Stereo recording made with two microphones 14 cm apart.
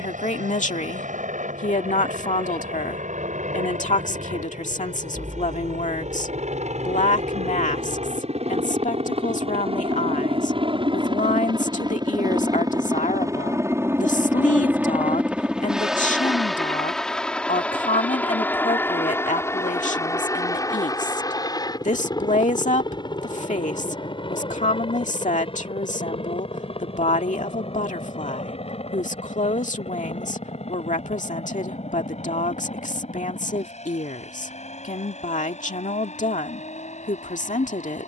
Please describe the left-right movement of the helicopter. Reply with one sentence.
You can hear the helicopter move from right to left.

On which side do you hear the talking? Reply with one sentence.
You can hear the talking on the left.